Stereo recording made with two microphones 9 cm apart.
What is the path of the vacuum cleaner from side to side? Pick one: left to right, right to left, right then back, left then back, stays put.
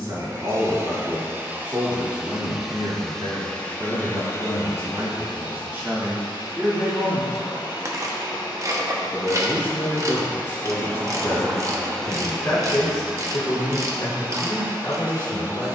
left then back.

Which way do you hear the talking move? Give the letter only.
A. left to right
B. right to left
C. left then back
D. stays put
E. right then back
B.